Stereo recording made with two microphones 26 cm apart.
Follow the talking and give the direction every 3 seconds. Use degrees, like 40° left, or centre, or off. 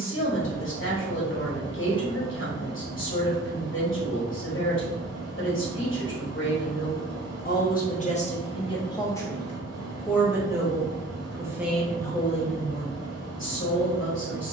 50° left, 50° left, 40° left, centre, 40° left.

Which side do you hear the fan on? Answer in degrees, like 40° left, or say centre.
60° right.